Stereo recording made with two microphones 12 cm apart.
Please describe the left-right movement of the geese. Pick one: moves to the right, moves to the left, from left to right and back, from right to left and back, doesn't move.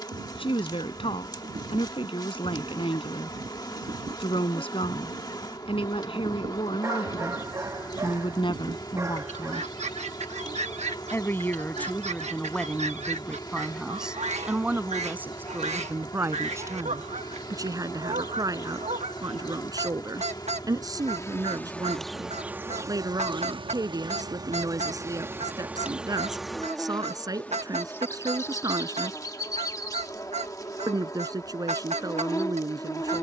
doesn't move.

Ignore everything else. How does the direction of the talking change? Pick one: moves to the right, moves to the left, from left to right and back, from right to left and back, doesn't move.
moves to the right.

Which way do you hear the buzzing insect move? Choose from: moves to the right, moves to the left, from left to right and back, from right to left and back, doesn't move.
from left to right and back.